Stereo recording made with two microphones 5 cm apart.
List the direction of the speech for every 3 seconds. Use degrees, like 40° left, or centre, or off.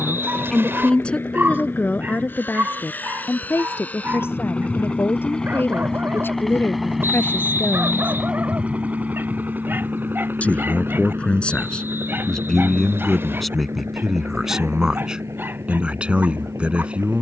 30° left, 50° left, 50° left, 20° left, centre, 20° right.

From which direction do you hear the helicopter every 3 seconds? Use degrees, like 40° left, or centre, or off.
50° left, 30° left, 10° right, 40° right, 60° right, 70° right.